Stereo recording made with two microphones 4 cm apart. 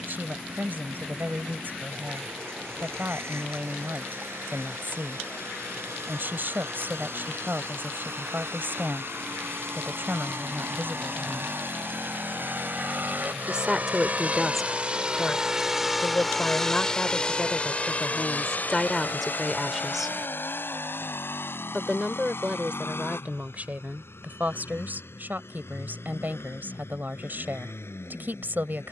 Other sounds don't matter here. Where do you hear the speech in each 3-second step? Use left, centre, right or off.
right, right, right, right, centre, left, centre, right, right, right.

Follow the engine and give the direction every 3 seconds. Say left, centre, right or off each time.
right, right, right, right, right, centre, left, left, left, left.